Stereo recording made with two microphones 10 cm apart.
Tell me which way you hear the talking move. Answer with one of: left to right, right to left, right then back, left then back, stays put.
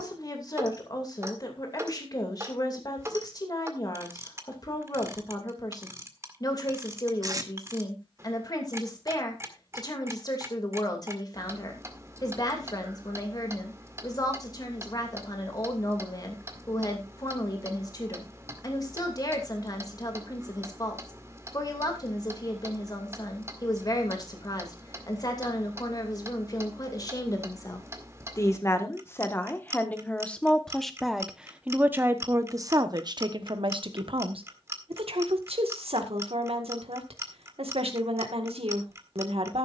left to right.